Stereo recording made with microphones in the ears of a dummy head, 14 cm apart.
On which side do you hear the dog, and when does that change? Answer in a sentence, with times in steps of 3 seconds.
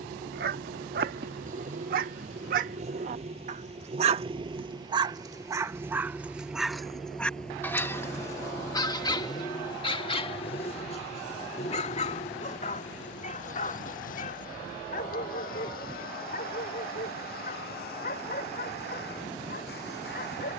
In this clip you hear the dog on the right from 0 s, in the centre from 6 s and on the left from 9 s.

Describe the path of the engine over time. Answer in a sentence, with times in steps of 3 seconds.
In this clip you hear the engine on the right from 0 s, in the centre from 6 s and on the left from 9 s.